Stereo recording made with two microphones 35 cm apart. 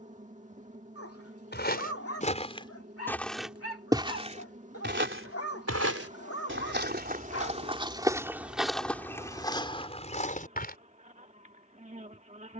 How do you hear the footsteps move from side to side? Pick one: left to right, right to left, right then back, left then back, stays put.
right then back.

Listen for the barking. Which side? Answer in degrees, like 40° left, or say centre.
40° left.